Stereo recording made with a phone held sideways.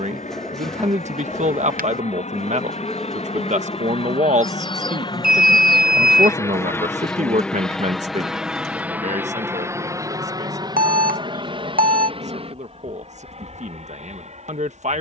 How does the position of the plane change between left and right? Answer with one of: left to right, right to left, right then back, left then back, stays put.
left to right.